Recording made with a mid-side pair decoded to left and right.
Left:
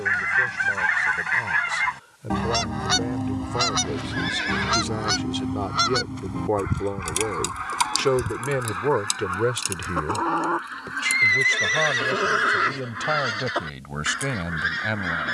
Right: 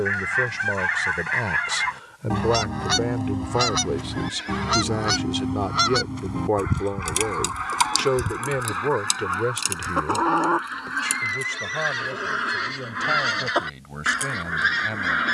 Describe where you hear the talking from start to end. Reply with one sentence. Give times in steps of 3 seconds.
In this clip you hear the talking on the right from 0 s, in the centre from 6 s and on the left from 9 s.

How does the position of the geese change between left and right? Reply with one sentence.
You can hear the geese go from the left side to the right.